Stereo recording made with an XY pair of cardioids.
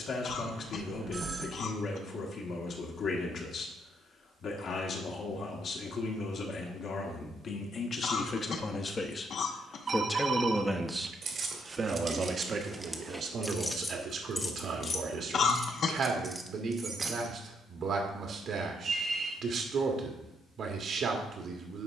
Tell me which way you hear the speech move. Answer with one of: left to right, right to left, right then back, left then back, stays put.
left to right.